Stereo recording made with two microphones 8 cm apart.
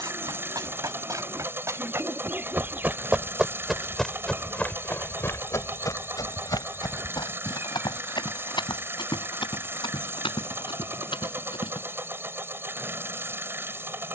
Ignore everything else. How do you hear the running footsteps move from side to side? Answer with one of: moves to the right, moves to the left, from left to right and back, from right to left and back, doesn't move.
moves to the left.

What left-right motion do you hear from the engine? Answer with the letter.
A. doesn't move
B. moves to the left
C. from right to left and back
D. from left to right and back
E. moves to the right
A.